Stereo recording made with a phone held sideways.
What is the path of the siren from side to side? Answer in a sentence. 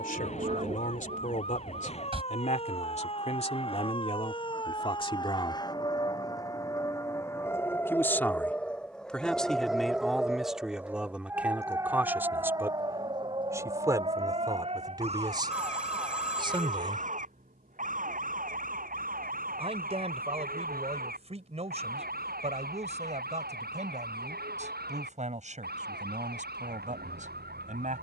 You can hear the siren move from left to right.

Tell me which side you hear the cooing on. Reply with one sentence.
In this clip you hear the cooing on the right.